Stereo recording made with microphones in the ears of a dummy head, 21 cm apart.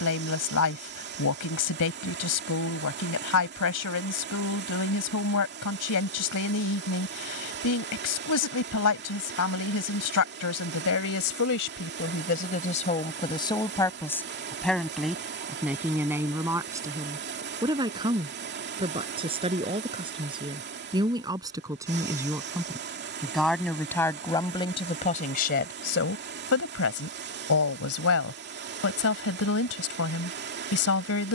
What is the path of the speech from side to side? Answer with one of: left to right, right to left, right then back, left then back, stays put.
right then back.